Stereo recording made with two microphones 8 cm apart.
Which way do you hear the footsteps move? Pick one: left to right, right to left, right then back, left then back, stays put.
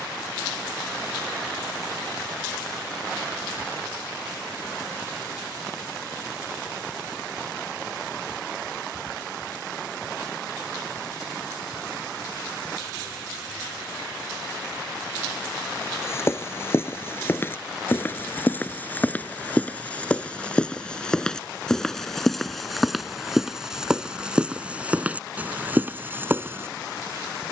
left to right.